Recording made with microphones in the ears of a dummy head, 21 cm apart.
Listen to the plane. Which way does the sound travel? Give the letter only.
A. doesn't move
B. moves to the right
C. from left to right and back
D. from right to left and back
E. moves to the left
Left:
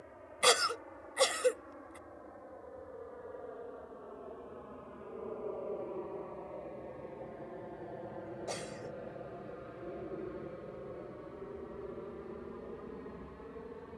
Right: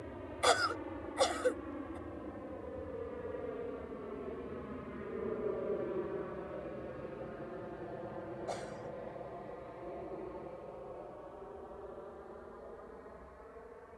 E.